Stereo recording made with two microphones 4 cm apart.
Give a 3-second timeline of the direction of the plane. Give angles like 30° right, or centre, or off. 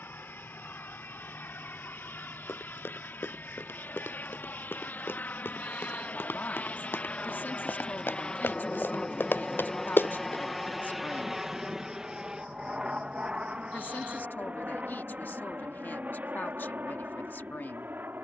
70° left, 60° left, 30° left, centre, 30° right, 50° right.